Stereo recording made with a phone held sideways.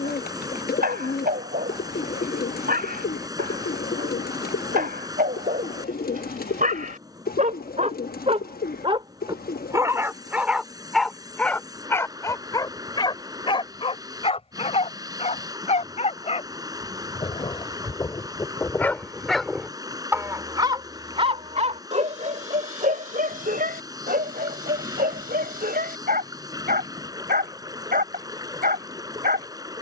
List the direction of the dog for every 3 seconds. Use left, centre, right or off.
right, right, right, centre, left, left, centre, right, right, right.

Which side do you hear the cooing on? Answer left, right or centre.
left.